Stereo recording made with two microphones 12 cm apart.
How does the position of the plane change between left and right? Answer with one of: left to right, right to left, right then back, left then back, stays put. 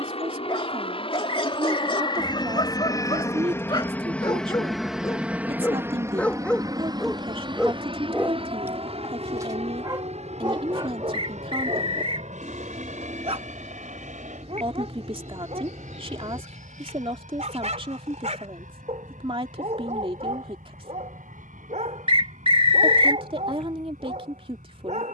left to right.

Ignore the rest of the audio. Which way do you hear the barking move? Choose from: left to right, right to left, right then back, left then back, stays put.
left to right.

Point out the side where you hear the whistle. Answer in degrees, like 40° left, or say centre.
50° right.